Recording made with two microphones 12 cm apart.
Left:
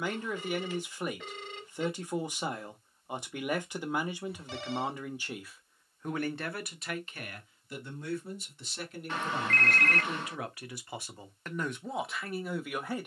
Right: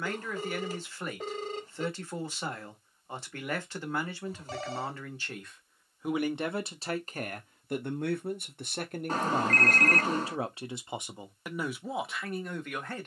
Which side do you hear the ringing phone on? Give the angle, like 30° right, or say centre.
40° right.